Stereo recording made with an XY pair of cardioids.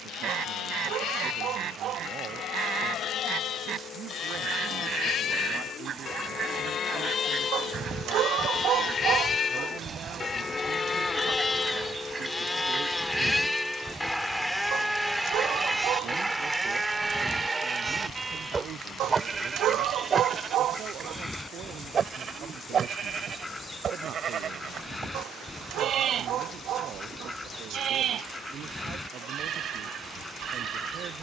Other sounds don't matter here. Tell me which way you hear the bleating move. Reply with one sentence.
You can hear the bleating travel towards the right.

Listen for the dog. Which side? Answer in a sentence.
You can hear the dog on the right.